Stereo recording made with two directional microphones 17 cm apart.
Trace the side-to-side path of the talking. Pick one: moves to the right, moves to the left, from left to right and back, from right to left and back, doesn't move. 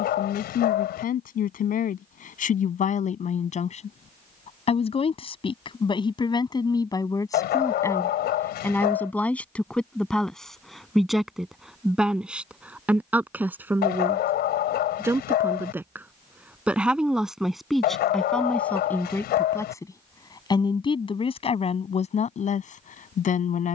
from left to right and back.